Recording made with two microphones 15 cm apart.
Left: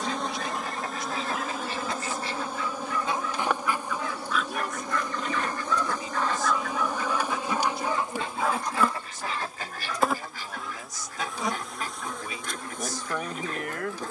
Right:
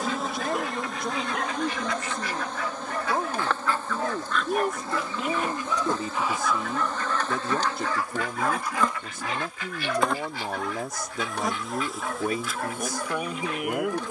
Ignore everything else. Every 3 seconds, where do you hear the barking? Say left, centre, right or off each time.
right, right, centre, right, right.